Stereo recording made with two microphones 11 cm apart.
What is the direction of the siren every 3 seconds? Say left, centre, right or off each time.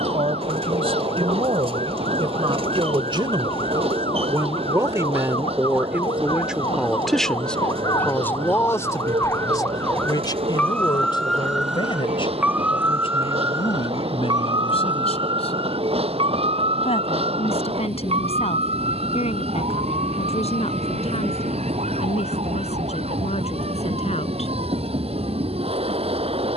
left, left, left, centre, right, right, right, right, right.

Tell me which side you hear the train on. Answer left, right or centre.
right.